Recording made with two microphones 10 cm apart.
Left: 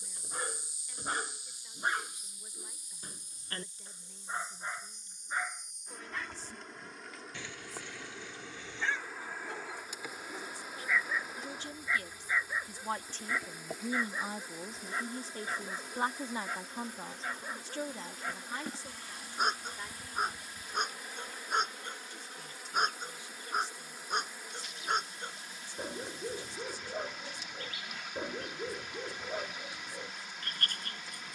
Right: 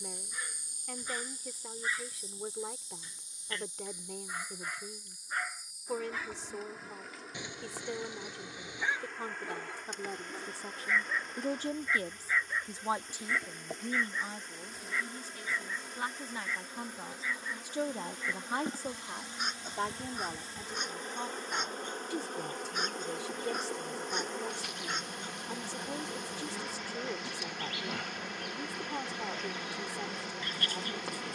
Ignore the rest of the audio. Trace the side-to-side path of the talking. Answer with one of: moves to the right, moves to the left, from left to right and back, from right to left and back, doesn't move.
from right to left and back.